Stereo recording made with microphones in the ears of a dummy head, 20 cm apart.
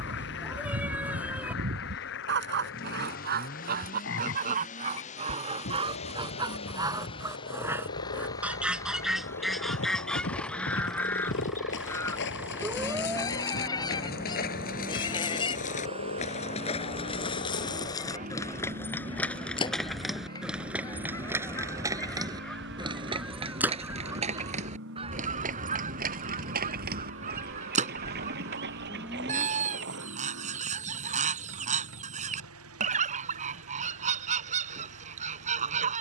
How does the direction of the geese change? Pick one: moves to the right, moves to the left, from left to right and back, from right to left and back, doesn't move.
from right to left and back.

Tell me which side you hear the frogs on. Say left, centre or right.
left.